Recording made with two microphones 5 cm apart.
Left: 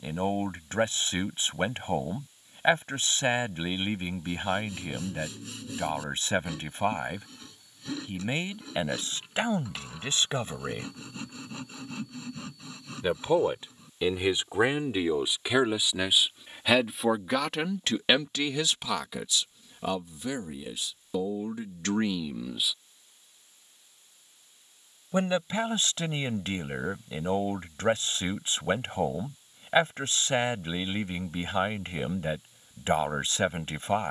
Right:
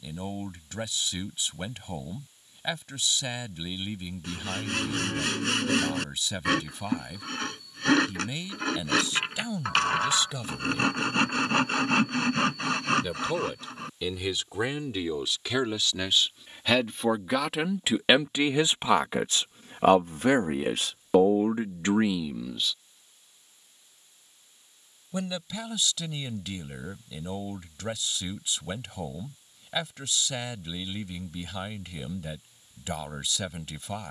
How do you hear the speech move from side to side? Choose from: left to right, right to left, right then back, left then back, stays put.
right then back.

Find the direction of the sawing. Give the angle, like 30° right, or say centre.
80° right.